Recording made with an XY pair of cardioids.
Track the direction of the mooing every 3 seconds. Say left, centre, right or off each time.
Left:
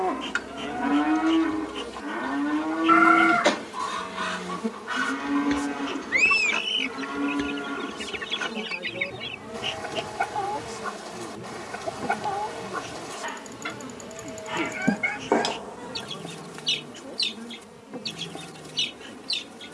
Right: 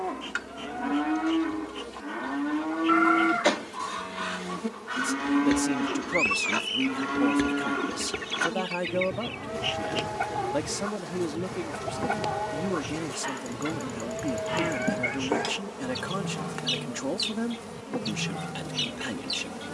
left, centre, right, right, right, right, right.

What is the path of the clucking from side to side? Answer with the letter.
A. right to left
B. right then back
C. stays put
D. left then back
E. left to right
C.